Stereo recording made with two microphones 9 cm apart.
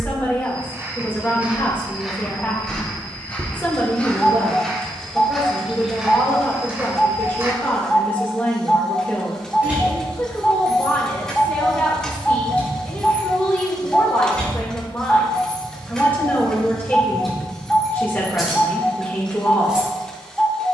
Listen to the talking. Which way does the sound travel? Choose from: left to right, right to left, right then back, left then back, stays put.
stays put.